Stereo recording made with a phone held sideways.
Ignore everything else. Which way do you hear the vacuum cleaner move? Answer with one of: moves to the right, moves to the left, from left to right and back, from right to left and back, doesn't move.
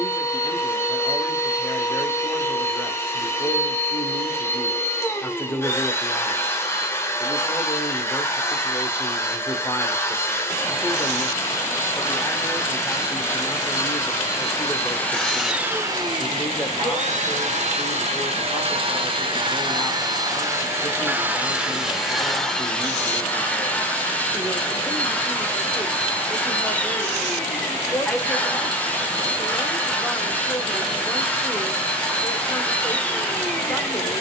from left to right and back.